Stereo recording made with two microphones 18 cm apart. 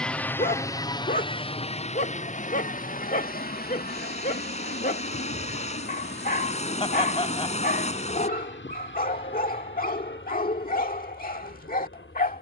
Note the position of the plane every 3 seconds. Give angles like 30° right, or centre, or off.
30° left, 50° left, 60° left, 70° left.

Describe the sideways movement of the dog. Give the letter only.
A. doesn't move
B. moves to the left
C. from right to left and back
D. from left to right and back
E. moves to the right
A.